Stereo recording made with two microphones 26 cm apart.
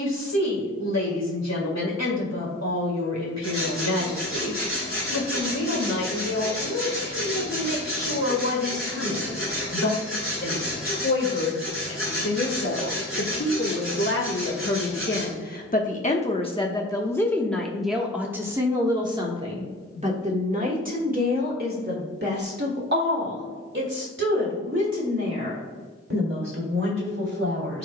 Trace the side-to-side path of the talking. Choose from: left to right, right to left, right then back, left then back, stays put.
left to right.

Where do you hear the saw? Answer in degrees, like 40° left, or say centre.
40° right.